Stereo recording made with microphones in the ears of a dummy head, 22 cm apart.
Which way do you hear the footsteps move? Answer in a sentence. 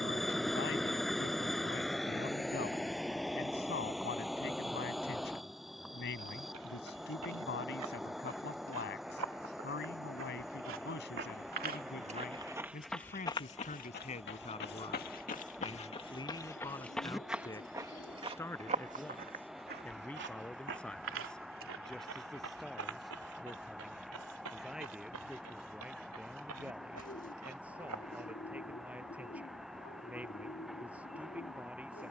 You can hear the footsteps move from right to left and back again.